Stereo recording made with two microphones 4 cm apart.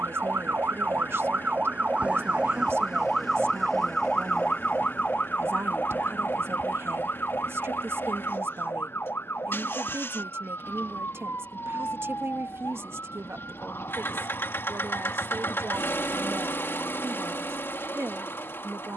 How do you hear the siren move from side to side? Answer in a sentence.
You can hear the siren move to the left.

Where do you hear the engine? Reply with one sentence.
In this clip you hear the engine on the left.